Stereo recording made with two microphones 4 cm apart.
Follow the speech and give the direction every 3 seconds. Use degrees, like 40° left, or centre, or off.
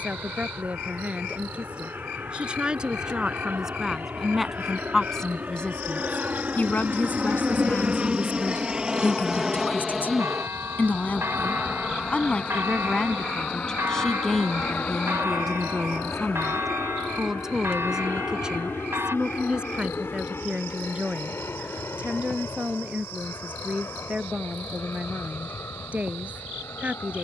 30° right, centre, 50° left, 50° left, 20° left, centre, 20° right, 30° right, 30° right.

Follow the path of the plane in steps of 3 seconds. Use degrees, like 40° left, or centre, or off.
60° right, 50° right, 30° right, centre, 30° left, 50° left, 60° left, 70° left, 70° left.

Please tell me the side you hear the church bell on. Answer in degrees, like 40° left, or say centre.
80° right.